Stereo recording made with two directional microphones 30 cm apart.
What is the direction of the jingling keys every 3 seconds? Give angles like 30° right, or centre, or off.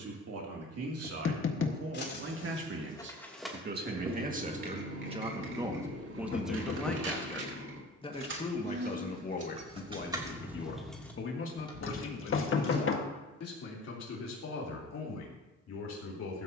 30° left, 30° right, 50° right, 10° right, 30° left, off.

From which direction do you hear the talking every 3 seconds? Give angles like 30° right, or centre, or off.
50° right, 20° right, 10° left, 40° left, 50° left, 60° left.